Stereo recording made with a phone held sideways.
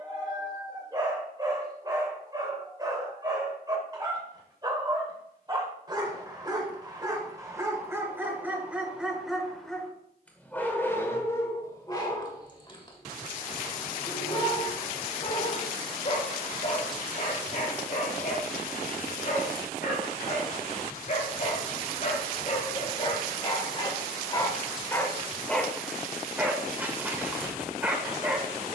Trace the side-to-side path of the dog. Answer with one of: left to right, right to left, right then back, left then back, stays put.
left then back.